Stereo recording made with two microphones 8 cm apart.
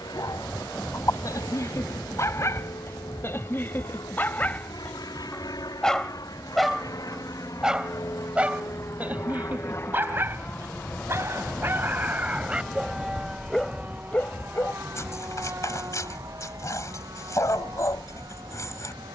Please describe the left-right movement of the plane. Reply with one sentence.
You can hear the plane go from the left side to the right.